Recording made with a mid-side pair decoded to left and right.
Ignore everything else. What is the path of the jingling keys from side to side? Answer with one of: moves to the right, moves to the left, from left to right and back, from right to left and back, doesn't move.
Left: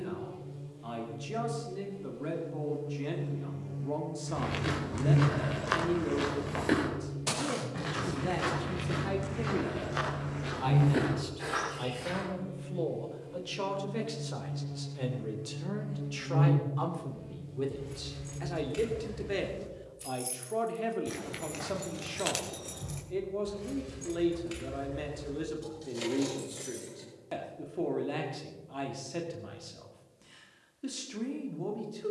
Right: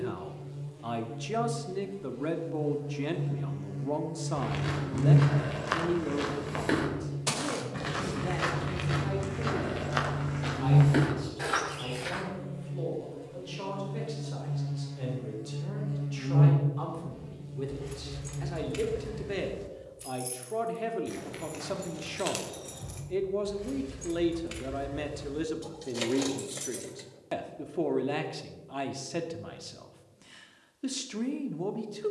from right to left and back.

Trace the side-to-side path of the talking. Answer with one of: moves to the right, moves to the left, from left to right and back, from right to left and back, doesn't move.
from right to left and back.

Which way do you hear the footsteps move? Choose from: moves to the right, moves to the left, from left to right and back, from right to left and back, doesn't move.
moves to the right.